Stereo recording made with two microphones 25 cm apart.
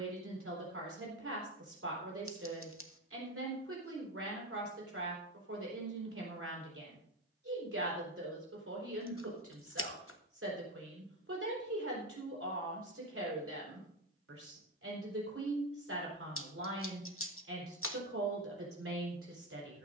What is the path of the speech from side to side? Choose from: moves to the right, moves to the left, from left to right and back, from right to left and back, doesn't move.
doesn't move.